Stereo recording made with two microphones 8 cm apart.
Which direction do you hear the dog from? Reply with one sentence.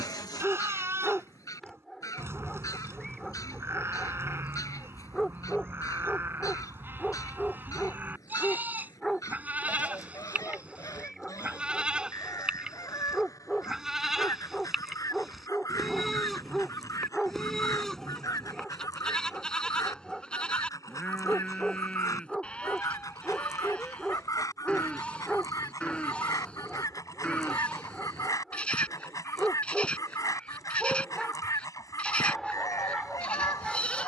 In this clip you hear the dog in the centre.